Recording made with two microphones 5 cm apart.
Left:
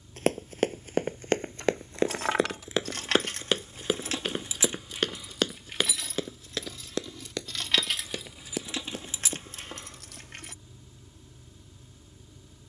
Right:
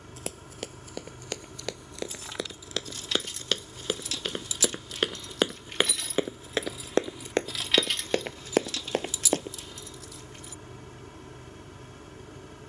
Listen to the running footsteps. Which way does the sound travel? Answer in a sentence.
You can hear the running footsteps go from the left side to the right.